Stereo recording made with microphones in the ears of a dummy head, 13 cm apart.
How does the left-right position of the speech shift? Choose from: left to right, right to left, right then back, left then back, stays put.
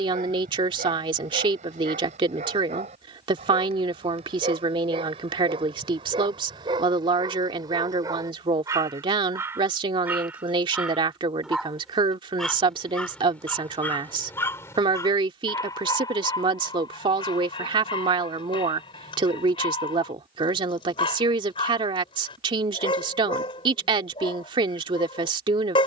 stays put.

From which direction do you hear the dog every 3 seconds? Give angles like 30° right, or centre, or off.
50° right, 40° right, 30° right, 10° right, 10° left, 30° left, 30° left, 30° left, 30° left.